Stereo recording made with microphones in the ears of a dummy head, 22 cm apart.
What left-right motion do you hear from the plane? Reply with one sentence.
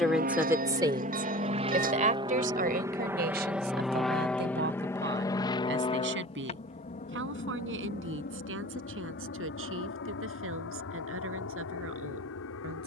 In this clip you hear the plane move from right to left.